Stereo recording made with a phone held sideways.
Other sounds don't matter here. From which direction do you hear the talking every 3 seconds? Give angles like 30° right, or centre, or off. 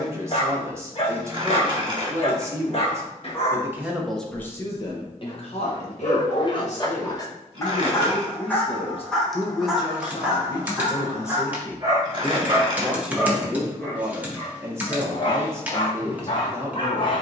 20° right, 20° left, 60° left, 30° left, 10° right, 20° right.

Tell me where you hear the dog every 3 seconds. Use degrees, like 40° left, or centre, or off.
50° left, 50° left, 30° left, 10° right, centre, 40° left.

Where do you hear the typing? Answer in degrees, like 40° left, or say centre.
10° right.